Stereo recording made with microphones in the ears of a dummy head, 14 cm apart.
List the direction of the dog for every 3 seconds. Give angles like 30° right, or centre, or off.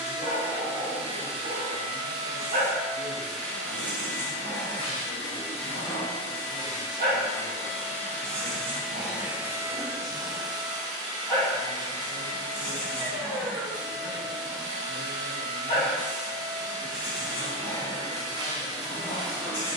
50° right, 50° right, 40° right, centre, 40° left, 50° left, 50° left.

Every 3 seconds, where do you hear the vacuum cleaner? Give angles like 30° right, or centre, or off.
30° right, 20° left, 20° left, 20° right, 30° right, 30° right, 30° right.